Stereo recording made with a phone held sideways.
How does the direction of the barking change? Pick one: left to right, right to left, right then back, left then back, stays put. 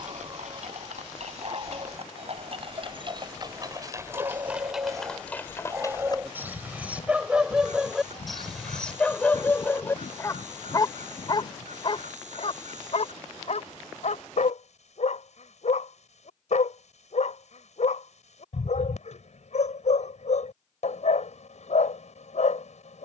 right to left.